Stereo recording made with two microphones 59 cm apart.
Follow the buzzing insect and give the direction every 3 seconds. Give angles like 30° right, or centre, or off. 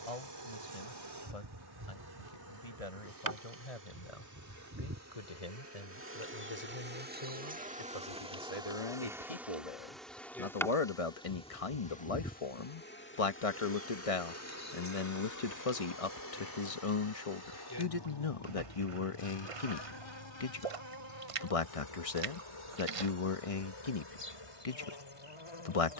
40° right, 30° right, 10° right, centre, 20° left, 30° left, 50° left, 50° left, 60° left.